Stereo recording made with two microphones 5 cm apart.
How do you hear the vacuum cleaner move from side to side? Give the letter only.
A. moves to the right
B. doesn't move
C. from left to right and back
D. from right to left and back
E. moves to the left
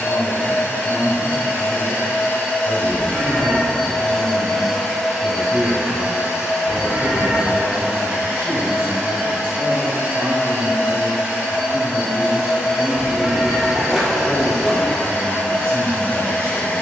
C.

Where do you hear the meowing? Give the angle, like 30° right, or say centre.
10° right.